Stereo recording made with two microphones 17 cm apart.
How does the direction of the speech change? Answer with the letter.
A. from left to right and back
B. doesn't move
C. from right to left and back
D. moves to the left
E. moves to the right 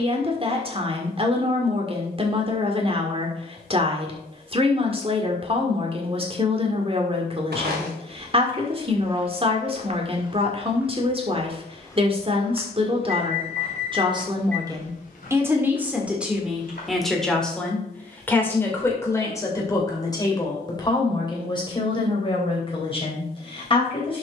D.